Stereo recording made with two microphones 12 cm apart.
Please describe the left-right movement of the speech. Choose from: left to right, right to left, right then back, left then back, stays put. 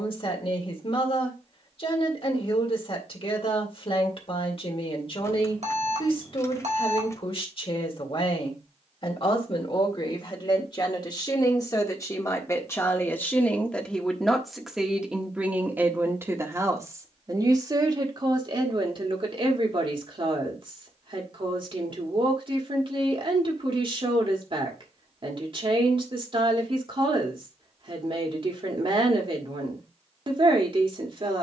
left to right.